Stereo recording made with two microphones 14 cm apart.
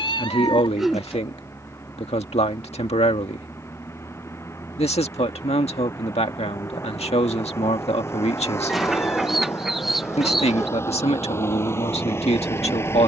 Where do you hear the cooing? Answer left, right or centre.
centre.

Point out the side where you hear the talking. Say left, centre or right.
left.